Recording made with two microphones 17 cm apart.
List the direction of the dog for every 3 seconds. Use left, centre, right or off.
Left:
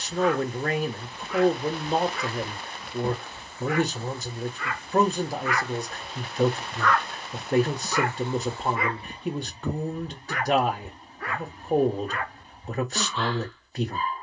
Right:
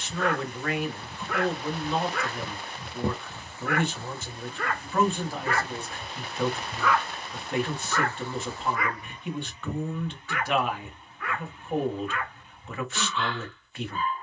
right, right, centre, left, left.